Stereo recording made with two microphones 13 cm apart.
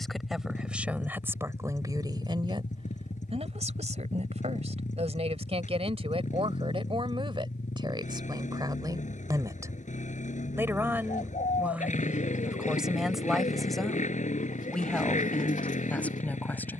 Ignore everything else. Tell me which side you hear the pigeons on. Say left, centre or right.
left.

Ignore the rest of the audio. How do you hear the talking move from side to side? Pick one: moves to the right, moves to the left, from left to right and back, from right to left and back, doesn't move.
from left to right and back.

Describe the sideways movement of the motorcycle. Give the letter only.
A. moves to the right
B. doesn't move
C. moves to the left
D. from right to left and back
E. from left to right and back
B.